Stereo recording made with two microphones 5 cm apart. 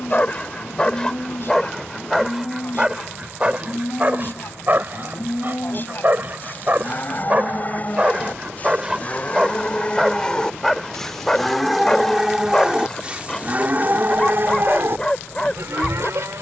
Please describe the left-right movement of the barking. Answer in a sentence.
You can hear the barking go right and come back.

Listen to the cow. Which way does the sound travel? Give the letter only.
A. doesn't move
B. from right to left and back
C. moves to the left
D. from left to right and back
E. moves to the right
E.